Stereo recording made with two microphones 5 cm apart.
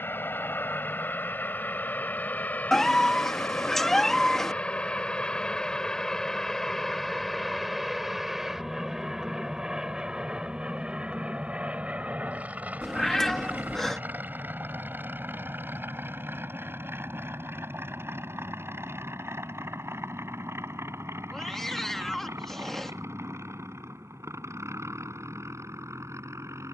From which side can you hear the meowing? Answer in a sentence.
In this clip you hear the meowing in the centre.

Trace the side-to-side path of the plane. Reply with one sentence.
You can hear the plane go from the left side to the right.